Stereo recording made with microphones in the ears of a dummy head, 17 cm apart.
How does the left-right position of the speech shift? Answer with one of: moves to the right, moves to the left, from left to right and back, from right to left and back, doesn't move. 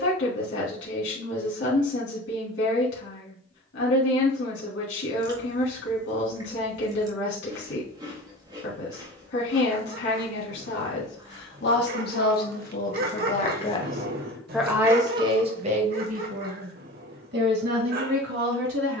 moves to the right.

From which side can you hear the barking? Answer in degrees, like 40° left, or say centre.
50° right.